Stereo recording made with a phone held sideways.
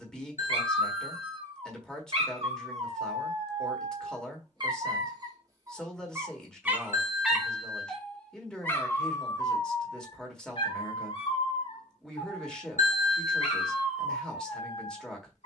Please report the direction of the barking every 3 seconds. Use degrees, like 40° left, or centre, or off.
40° right, 40° right, centre, 40° left, 60° left.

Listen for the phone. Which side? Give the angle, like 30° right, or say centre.
70° left.